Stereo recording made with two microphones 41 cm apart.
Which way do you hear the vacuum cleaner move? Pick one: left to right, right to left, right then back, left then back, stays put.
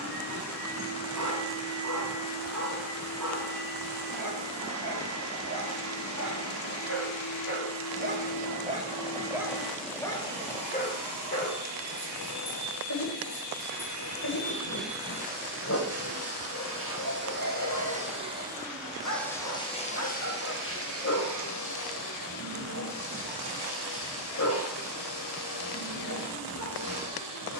right then back.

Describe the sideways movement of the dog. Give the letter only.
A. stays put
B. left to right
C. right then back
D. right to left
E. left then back
D.